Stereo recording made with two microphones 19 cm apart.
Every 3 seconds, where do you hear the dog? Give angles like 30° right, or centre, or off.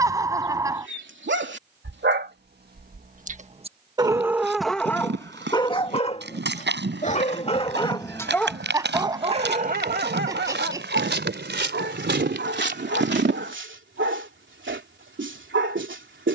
70° right, centre, 20° left, 60° right, 80° right, 80° right.